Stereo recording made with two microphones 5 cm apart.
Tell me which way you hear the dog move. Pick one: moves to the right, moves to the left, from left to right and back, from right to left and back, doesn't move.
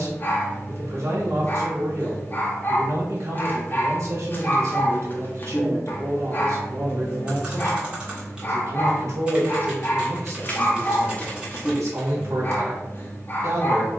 doesn't move.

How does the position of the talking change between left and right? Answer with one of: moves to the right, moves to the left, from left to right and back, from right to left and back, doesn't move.
doesn't move.